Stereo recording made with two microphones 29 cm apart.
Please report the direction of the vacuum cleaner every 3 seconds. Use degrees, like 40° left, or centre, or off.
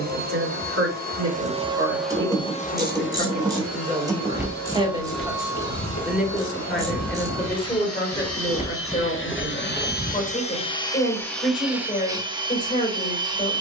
10° right, 60° left, 60° left, 20° left, 10° right.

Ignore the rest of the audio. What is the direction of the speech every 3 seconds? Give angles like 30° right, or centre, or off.
50° right, 20° right, 10° left, 30° left, 30° left.